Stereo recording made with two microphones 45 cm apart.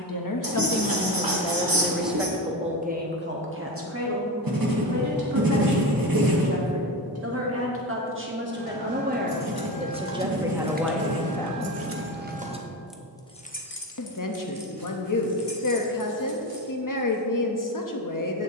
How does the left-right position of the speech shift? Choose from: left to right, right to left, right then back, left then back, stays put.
right then back.